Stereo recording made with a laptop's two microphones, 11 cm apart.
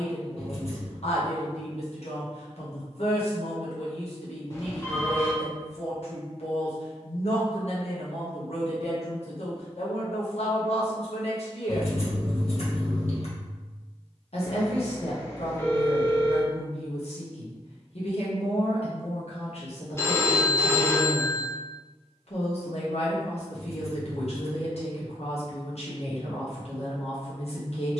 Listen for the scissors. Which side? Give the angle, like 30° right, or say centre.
70° left.